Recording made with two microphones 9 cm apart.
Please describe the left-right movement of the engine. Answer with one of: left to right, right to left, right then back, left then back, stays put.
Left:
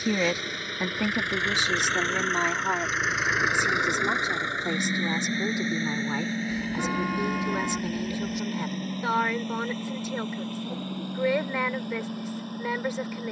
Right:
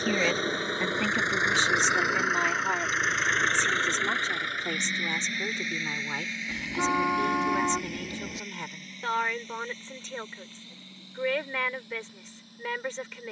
right to left.